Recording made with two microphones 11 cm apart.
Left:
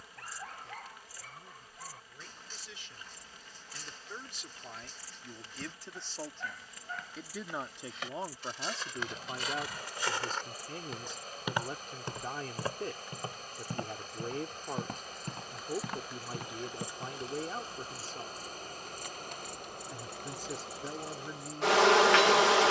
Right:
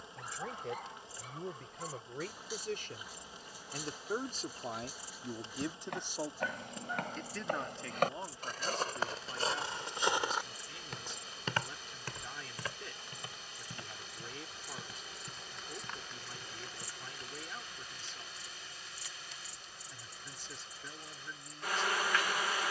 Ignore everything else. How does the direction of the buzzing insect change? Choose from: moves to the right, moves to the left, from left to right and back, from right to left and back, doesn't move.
moves to the left.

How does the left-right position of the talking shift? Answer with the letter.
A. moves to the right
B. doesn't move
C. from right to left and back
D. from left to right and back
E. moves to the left
E.